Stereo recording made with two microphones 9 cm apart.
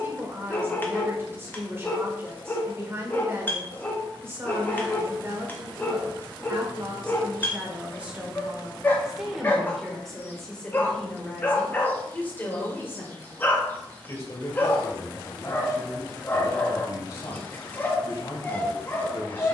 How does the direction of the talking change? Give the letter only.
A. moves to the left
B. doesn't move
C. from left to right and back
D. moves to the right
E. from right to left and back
A.